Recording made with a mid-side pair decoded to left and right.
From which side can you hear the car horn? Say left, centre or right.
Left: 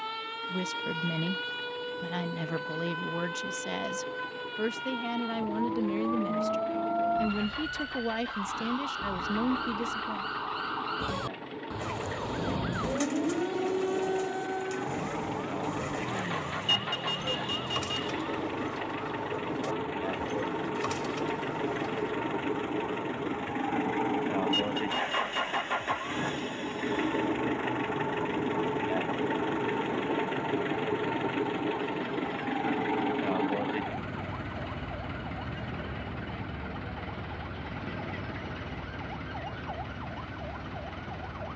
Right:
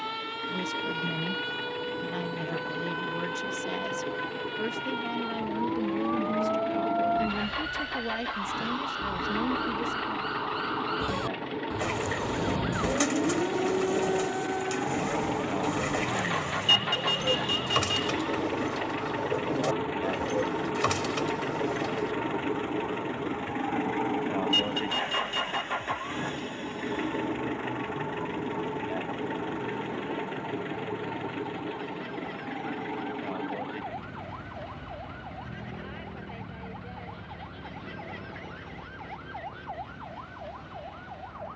right.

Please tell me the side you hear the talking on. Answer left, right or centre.
left.